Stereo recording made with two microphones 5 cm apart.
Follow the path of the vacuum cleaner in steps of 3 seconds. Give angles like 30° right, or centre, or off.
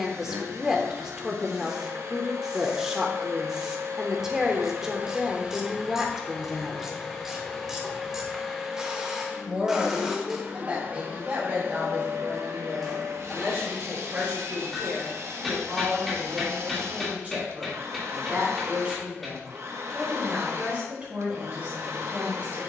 60° right, 50° right, centre, 30° right, 60° right, 60° right, 60° right, 60° right.